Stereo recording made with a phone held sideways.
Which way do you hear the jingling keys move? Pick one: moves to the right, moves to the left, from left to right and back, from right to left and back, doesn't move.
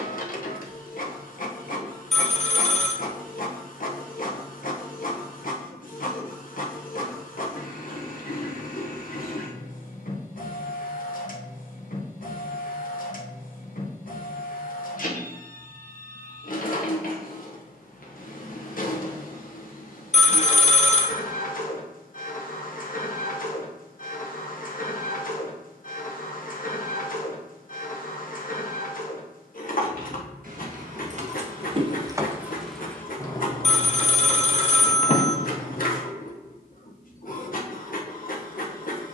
moves to the left.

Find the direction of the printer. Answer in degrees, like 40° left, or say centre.
60° left.